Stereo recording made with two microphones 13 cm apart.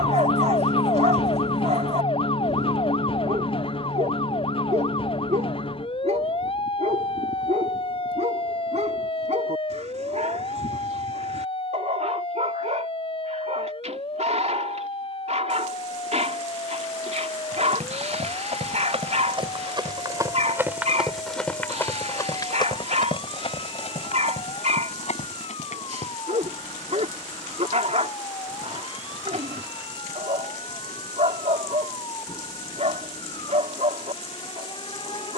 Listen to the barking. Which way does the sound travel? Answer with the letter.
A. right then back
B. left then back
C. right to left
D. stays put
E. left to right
D.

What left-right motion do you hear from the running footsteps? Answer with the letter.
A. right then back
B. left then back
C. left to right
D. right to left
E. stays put
D.